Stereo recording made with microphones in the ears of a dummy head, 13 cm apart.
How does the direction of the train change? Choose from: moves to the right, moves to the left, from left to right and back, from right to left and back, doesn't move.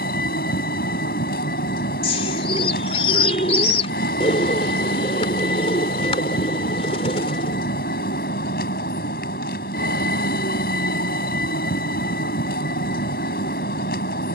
doesn't move.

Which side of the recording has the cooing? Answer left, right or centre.
left.